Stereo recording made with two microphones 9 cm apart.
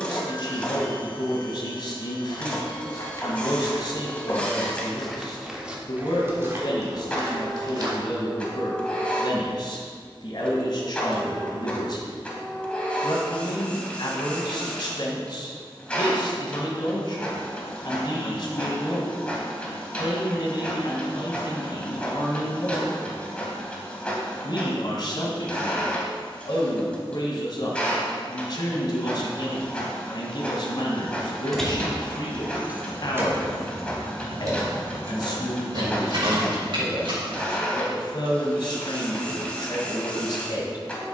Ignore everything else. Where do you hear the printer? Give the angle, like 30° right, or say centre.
10° left.